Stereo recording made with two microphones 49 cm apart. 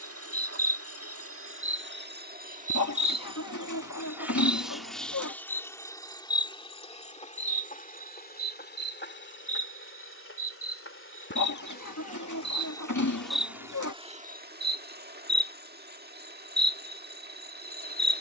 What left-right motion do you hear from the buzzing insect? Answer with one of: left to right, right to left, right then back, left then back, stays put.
left then back.